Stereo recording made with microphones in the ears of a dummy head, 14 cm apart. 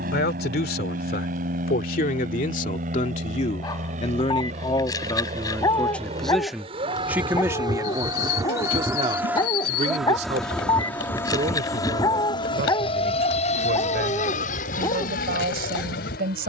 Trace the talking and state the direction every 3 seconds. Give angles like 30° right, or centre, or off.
60° left, 30° left, 10° right, 40° right, 60° right, 60° right.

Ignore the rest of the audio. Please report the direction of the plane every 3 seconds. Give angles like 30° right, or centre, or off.
60° right, 50° right, 30° right, centre, 40° left, 60° left.